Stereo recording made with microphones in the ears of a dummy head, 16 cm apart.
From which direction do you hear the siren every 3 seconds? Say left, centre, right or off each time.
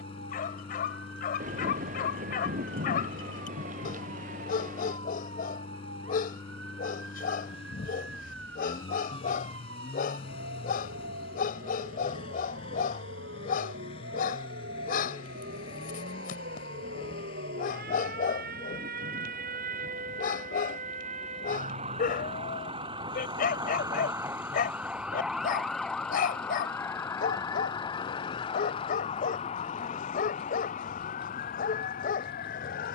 right, right, right, right, right, right, right, right, centre, left, left.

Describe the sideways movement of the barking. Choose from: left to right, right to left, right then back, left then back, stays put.
stays put.